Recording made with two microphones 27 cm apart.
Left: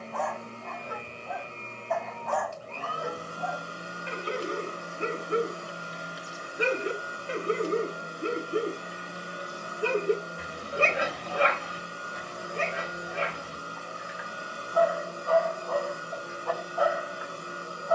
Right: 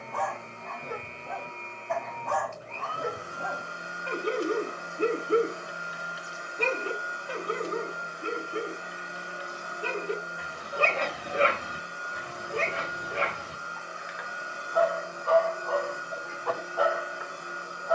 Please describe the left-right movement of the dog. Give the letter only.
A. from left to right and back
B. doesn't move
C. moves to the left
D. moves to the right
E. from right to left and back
E.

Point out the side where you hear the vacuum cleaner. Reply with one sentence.
You can hear the vacuum cleaner on the left.